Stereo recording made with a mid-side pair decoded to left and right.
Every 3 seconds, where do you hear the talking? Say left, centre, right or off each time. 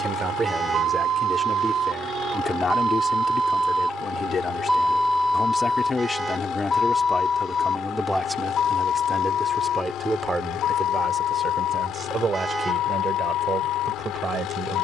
centre, left, centre, right, right.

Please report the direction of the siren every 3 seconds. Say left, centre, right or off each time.
right, centre, left, left, left.